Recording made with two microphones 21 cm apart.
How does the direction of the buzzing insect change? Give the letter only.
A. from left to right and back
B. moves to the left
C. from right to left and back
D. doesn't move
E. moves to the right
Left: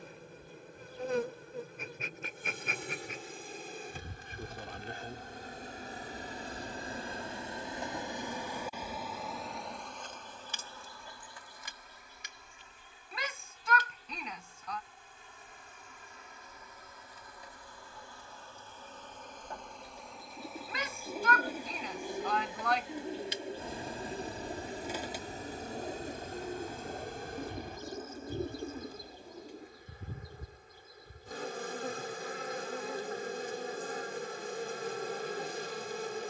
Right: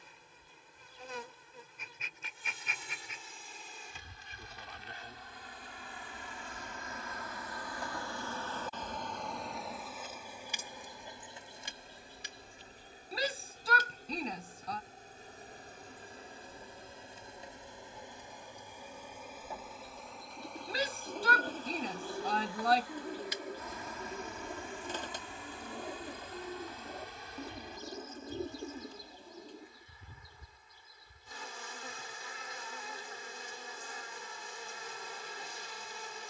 A.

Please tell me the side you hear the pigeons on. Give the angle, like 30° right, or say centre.
10° left.